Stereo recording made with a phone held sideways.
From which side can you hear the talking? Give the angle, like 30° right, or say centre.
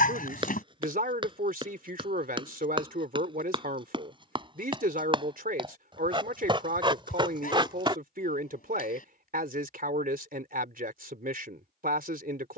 60° right.